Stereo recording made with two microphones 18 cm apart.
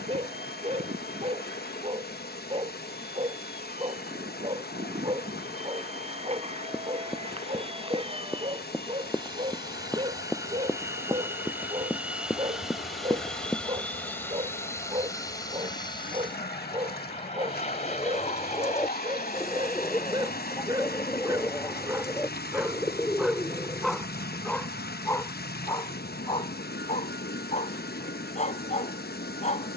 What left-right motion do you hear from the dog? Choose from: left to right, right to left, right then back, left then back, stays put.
right to left.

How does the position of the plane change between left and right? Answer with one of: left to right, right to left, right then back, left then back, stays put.
right to left.